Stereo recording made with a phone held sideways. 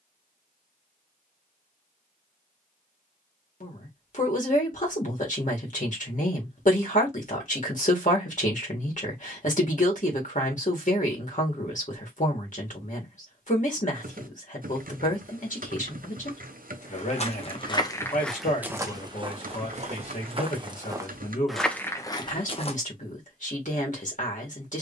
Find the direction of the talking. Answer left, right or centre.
left.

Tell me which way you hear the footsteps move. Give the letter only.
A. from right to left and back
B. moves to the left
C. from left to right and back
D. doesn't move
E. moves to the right
C.